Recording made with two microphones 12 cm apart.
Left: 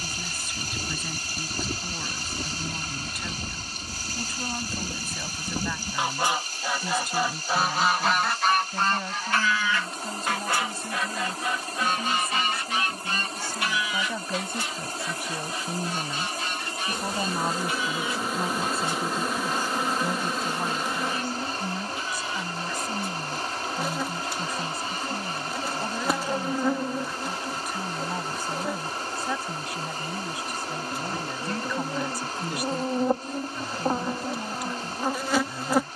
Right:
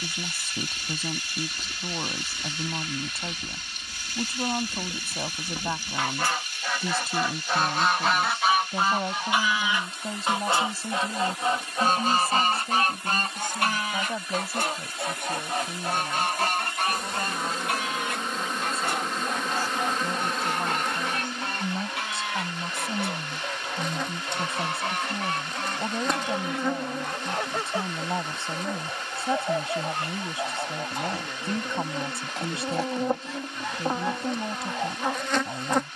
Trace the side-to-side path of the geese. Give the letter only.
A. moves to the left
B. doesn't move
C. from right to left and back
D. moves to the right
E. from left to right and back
D.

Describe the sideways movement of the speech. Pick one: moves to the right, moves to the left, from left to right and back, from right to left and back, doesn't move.
from right to left and back.